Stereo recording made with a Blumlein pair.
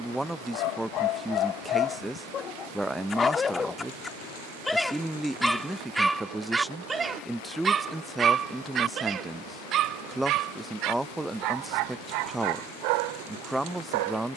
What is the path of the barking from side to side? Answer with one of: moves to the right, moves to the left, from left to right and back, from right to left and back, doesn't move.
moves to the right.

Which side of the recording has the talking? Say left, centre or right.
centre.